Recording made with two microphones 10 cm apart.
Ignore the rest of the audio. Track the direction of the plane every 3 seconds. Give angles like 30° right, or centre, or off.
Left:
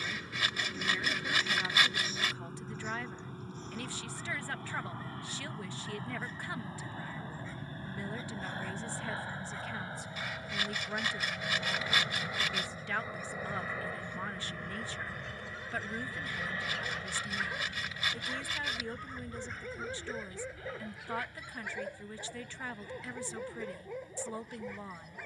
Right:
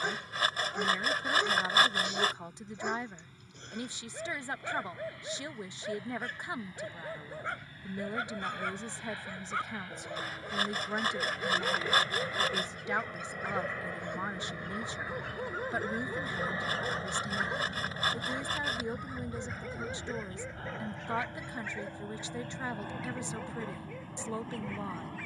60° left, 50° left, 40° left, 30° left, 10° left, 20° right, 40° right, 50° right, 60° right.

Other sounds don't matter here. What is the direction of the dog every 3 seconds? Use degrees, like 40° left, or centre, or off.
70° right, 70° right, 70° right, 70° right, 70° right, 40° right, centre, 10° left, 20° left.